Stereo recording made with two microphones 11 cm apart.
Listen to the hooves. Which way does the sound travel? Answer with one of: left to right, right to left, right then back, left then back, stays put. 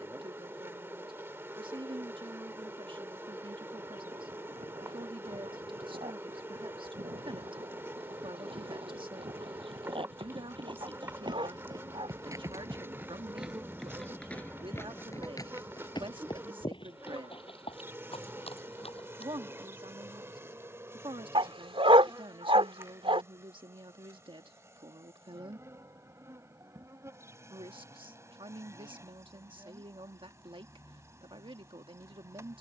right to left.